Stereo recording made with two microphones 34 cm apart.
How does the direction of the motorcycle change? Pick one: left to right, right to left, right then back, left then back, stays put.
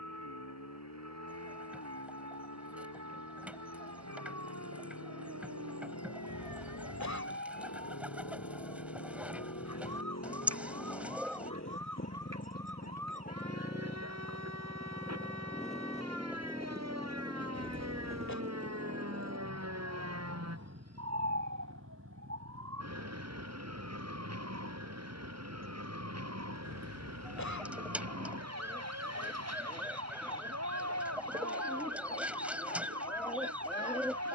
left to right.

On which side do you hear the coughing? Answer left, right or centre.
left.